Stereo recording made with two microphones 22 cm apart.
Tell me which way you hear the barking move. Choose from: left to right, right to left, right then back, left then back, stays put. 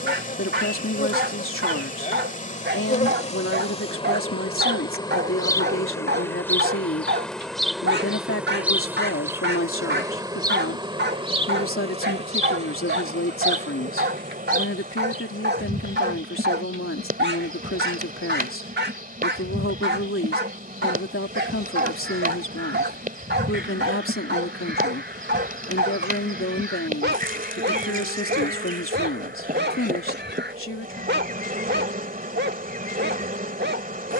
stays put.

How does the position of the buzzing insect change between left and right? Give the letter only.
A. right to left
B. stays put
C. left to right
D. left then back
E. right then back
C.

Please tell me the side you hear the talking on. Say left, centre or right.
left.